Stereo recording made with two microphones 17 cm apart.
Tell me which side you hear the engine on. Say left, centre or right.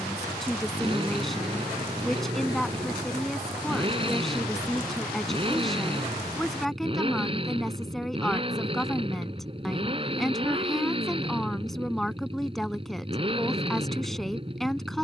right.